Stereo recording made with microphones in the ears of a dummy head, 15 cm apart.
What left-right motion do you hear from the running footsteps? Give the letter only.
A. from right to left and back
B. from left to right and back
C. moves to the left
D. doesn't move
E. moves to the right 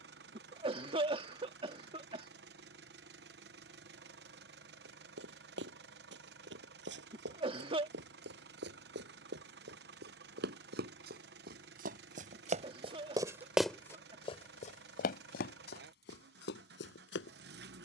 C.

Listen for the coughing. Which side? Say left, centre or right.
right.